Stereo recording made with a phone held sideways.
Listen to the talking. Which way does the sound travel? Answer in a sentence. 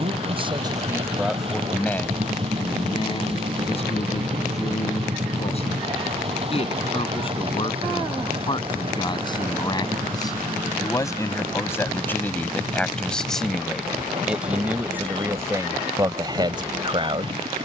In this clip you hear the talking move from right to left and back again.